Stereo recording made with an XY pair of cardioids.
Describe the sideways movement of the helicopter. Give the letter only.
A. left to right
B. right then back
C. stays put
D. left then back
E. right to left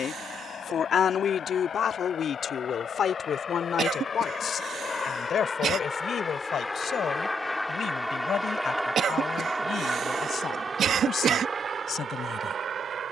A.